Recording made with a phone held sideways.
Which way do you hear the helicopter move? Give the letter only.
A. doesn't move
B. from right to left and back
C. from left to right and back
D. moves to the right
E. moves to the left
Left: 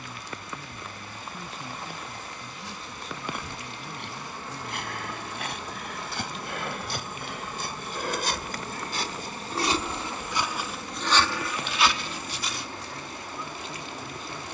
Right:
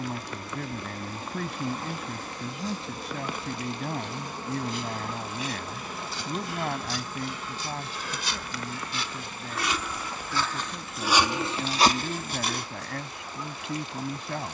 E.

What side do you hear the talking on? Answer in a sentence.
You can hear the talking on the right.